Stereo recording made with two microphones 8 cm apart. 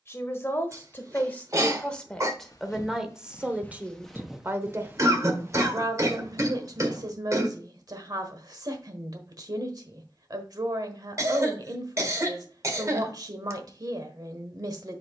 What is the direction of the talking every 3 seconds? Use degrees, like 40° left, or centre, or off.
20° left, 30° right, 50° right, 50° right, 50° right.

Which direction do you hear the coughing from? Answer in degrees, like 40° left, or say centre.
40° right.